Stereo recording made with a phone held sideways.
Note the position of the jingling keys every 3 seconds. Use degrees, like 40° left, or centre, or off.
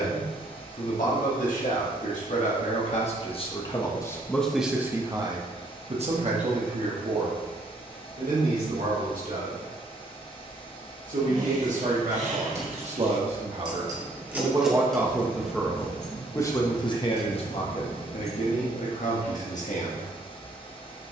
off, off, off, 60° right, 30° right, 30° left, 50° left.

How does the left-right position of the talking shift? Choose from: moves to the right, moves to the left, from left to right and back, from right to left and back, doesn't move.
from left to right and back.